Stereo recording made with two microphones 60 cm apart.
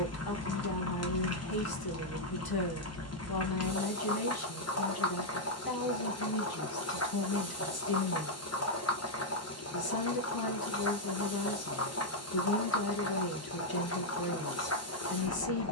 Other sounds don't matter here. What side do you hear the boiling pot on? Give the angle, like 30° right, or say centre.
30° left.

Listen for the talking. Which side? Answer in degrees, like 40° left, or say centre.
40° left.